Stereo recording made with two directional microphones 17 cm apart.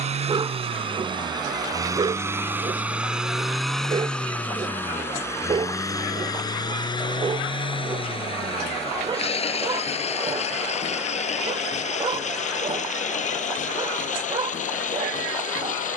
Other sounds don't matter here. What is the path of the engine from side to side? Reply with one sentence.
You can hear the engine move to the left.